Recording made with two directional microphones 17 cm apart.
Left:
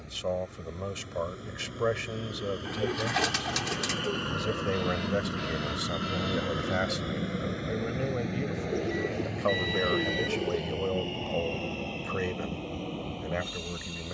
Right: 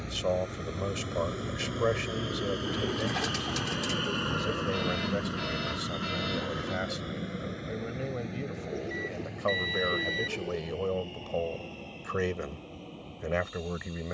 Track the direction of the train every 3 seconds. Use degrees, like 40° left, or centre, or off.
50° right, 10° right, 20° left, 40° left, 50° left.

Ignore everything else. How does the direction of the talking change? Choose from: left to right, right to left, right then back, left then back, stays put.
left then back.